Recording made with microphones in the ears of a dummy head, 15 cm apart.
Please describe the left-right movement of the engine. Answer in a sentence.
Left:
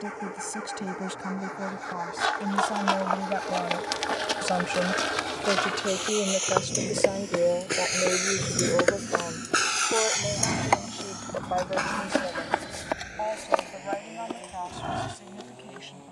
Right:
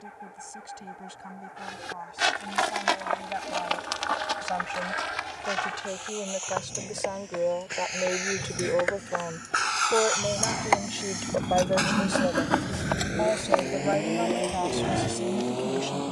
You can hear the engine move to the right.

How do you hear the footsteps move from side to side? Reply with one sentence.
You can hear the footsteps move from right to left and back again.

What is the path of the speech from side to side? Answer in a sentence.
You can hear the speech travel towards the right.